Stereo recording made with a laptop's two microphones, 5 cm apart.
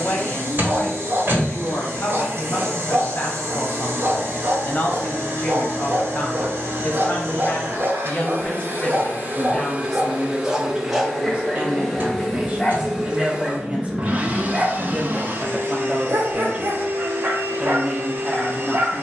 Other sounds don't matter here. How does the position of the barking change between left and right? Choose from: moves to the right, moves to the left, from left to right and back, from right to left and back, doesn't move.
from right to left and back.